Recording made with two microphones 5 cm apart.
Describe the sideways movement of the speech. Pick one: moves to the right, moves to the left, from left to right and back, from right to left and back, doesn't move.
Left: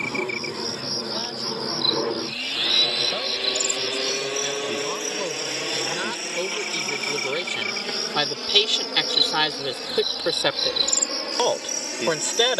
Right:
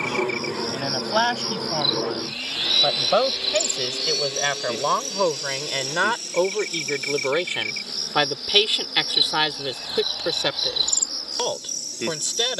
moves to the left.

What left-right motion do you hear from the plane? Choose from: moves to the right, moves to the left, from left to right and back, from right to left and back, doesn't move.
moves to the left.